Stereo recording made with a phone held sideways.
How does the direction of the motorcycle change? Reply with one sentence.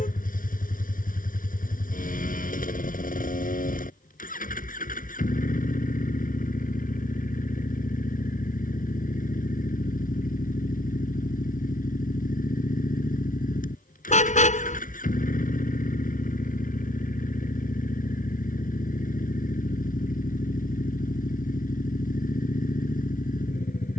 You can hear the motorcycle stay in one place.